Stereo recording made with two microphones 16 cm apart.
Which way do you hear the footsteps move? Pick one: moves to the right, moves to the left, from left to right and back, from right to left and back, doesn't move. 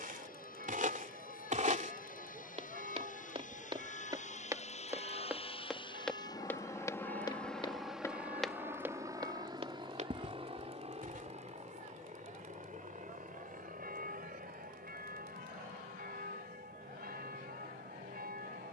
from right to left and back.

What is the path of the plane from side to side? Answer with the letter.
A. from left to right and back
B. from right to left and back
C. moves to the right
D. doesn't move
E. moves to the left
C.